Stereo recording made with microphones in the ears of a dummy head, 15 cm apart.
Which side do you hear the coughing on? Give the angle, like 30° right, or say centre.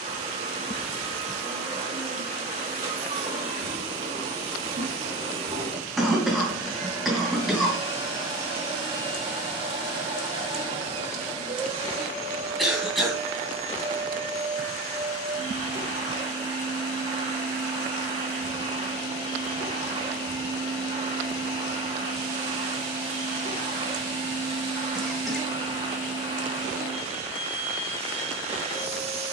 centre.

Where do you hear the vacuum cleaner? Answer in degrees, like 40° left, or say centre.
40° right.